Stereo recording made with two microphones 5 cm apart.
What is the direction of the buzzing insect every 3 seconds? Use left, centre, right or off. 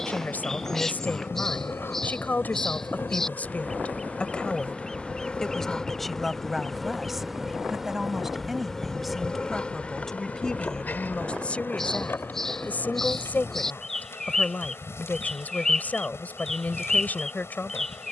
left, left, centre, left, left, left.